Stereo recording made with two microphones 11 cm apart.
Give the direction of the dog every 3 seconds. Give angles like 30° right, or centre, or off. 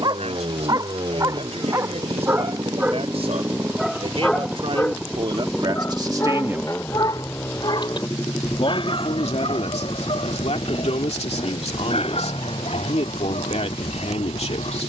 30° right, 10° left, 40° left, 60° left, 70° left.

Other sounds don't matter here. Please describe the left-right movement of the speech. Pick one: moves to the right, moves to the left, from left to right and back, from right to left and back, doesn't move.
moves to the left.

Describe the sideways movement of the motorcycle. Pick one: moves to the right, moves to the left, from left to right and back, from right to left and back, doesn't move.
moves to the left.